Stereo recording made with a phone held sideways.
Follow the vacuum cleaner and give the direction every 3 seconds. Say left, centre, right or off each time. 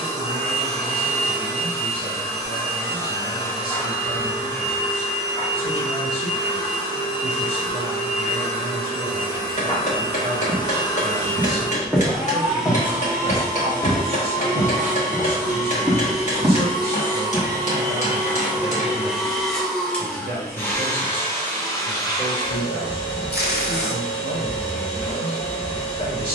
left, left, left, left, right, right, centre, left, left.